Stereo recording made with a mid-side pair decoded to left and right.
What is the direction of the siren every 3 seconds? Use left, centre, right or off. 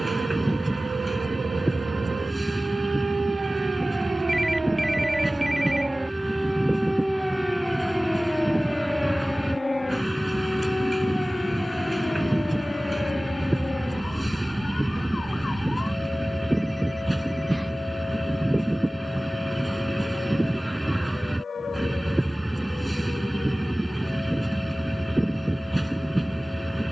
right, right, centre, left, left, left, left, left, left.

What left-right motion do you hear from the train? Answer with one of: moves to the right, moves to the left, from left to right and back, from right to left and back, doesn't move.
doesn't move.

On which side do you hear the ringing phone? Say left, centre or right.
centre.